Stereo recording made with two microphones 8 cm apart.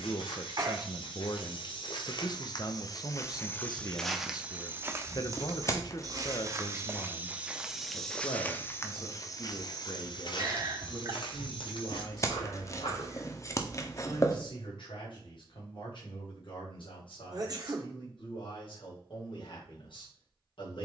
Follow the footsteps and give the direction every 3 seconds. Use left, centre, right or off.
left, centre, centre, left, left, off, off.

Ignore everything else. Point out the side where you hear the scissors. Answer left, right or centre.
left.